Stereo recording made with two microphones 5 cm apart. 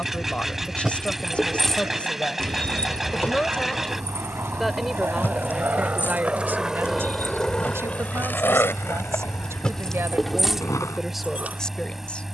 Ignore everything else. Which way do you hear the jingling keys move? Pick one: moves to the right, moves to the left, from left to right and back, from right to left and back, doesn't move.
from right to left and back.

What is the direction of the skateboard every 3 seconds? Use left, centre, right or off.
right, right, centre, left.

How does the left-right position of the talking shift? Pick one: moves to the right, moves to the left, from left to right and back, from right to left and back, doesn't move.
from left to right and back.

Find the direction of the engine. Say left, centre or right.
centre.